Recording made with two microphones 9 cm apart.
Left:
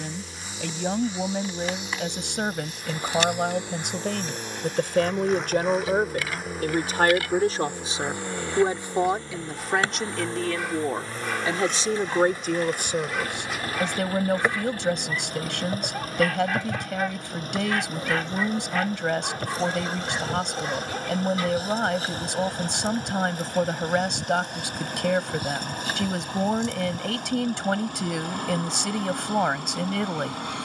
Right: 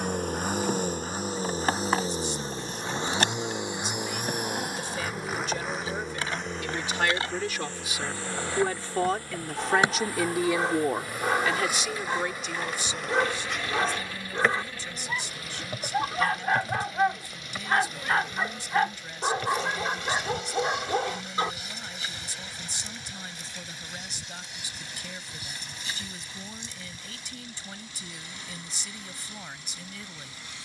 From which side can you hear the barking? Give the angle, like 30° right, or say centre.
30° right.